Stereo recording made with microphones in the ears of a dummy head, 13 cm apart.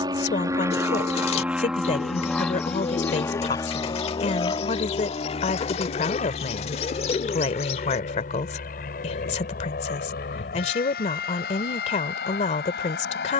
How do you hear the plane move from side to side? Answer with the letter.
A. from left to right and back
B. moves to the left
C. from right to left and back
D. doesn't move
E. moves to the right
B.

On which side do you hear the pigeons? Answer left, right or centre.
left.